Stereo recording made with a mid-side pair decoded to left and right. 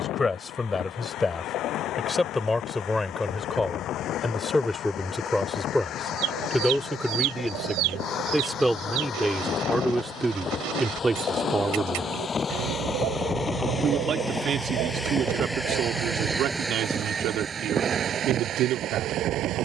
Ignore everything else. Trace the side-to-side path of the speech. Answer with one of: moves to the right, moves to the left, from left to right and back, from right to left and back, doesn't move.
moves to the right.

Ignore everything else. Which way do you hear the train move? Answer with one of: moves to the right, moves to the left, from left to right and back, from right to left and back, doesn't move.
moves to the right.